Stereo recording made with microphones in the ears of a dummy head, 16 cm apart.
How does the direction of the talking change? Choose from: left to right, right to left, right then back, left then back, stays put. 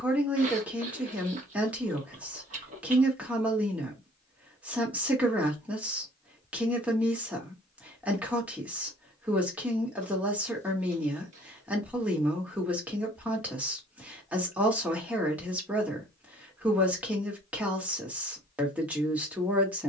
stays put.